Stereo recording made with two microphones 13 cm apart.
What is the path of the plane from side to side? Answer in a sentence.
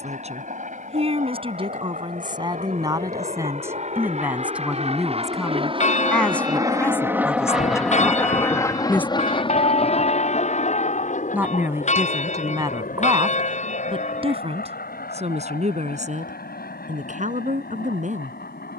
In this clip you hear the plane go from the right side to the left.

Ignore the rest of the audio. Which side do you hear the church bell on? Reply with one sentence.
In this clip you hear the church bell on the left.